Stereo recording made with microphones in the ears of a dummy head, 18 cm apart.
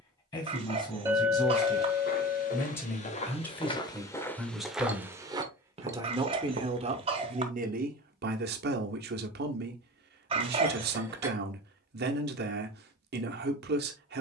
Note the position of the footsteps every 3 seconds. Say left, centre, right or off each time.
left, centre, right, off, off.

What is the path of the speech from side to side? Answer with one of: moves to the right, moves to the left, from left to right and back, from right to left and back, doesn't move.
moves to the right.